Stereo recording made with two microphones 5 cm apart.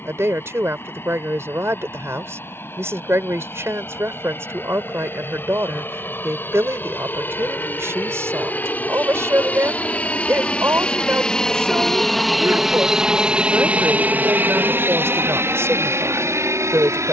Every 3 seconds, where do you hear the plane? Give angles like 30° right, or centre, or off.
60° left, 50° left, 40° left, 20° left, 20° right, 60° right.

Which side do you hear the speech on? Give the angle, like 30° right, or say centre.
60° right.